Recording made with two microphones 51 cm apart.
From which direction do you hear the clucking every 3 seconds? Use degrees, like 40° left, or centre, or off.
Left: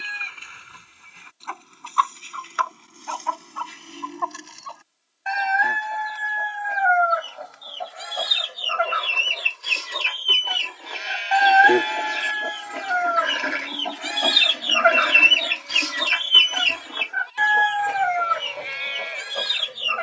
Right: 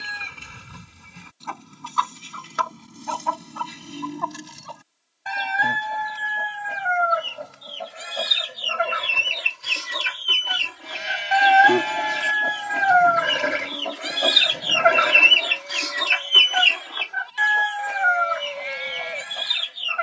60° right, 60° right, 50° right, 40° right, centre, 60° left, 80° left.